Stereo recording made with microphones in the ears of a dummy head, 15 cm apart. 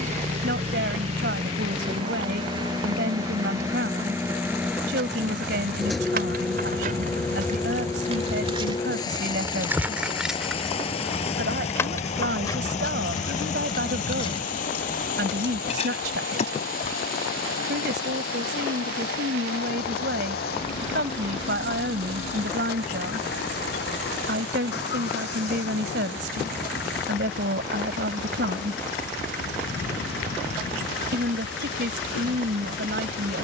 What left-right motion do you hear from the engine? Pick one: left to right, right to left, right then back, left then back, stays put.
right to left.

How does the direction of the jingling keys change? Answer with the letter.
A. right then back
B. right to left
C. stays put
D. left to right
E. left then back
B.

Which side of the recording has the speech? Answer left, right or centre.
right.